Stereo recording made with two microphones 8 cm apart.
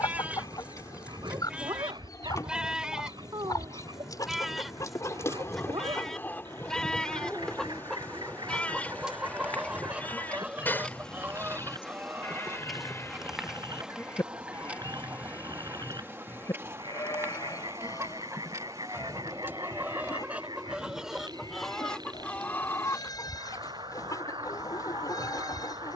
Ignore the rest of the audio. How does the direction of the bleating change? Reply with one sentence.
In this clip you hear the bleating go from the right side to the left.